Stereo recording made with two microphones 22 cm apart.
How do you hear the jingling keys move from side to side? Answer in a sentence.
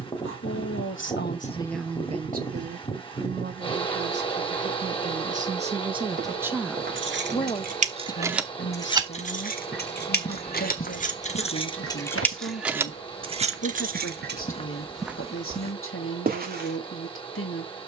You can hear the jingling keys go left and come back.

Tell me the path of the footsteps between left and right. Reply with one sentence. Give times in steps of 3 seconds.
In this clip you hear the footsteps not at all from 0 s, on the right from 6 s, on the left from 9 s and on the right from 15 s.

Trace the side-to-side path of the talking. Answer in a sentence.
In this clip you hear the talking go right and come back.